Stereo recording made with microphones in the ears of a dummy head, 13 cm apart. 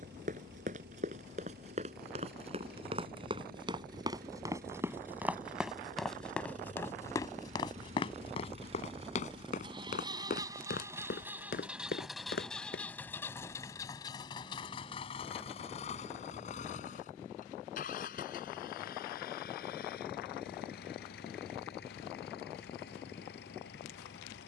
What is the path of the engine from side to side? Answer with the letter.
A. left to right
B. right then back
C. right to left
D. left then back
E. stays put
C.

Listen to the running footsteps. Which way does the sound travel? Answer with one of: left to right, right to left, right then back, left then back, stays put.
right to left.